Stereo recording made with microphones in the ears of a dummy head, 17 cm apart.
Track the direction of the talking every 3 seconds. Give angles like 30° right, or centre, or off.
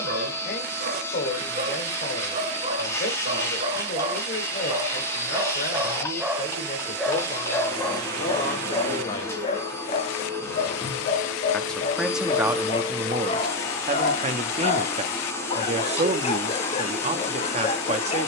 50° left, 50° left, 40° left, 10° left, 20° right, 40° right.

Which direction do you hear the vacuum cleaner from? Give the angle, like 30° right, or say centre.
10° left.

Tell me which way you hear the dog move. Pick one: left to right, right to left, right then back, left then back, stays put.
right to left.